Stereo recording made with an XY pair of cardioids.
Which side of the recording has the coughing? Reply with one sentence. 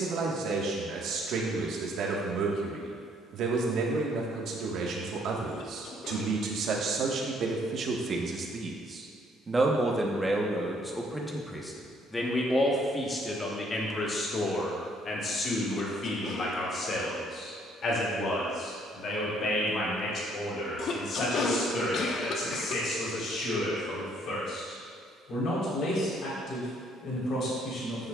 In this clip you hear the coughing on the left.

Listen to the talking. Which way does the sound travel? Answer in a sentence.
In this clip you hear the talking move from right to left.